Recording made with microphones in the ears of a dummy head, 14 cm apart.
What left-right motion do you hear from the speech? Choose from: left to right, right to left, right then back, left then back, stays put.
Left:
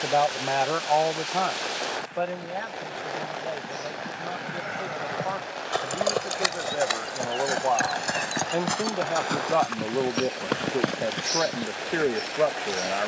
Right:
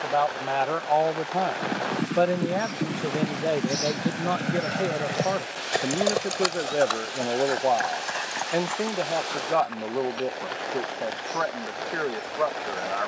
right then back.